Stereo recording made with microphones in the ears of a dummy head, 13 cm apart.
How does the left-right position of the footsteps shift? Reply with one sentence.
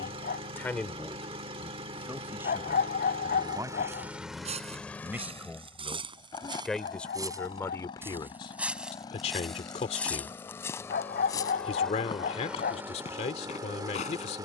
In this clip you hear the footsteps go from the right side to the left.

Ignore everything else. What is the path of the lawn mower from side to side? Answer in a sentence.
You can hear the lawn mower go left and come back.